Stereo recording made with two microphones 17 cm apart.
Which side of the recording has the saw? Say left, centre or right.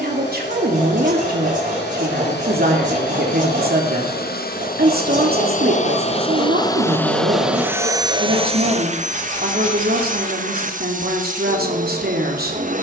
right.